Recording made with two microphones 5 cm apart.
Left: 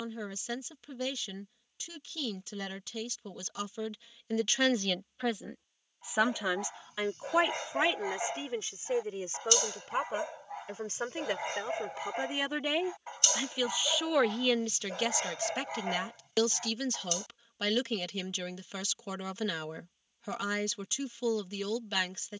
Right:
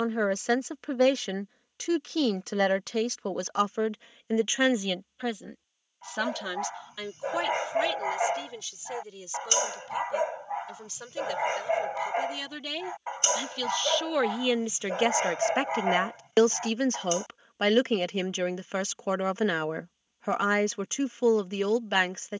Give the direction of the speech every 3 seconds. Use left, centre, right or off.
right, right, left, left, centre, right, right, right.